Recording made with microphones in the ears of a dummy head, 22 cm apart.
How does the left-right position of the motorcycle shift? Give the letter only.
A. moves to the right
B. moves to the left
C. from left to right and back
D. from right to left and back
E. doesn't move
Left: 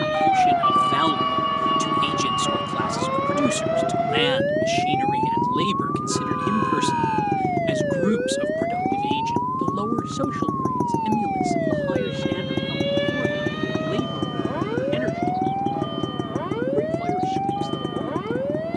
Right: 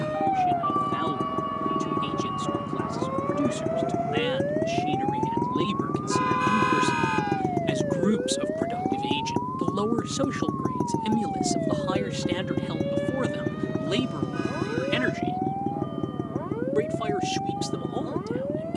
B.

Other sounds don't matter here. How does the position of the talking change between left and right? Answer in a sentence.
In this clip you hear the talking travel towards the right.